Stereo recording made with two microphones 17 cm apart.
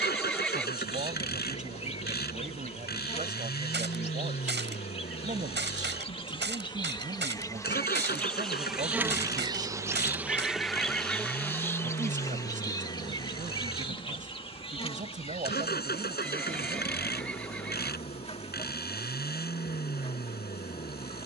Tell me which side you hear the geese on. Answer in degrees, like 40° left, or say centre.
80° right.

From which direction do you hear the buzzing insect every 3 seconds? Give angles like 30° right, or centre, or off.
40° left, 30° left, 20° left, centre, 20° left, 30° left, 30° left.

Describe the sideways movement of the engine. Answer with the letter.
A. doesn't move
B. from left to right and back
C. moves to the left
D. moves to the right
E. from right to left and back
A.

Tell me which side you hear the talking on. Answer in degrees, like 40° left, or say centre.
40° right.